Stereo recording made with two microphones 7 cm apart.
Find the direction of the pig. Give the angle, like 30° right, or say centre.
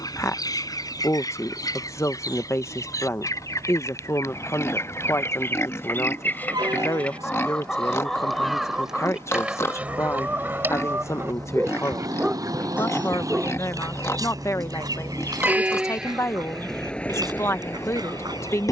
40° left.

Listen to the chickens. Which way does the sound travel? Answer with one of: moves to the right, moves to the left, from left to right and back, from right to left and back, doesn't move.
moves to the right.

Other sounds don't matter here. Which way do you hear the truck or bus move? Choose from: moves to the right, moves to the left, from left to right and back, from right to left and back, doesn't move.
moves to the left.